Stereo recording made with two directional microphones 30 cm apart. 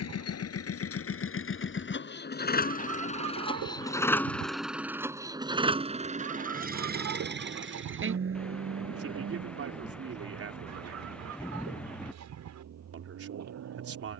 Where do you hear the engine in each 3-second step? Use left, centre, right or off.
left, centre, right, right, right.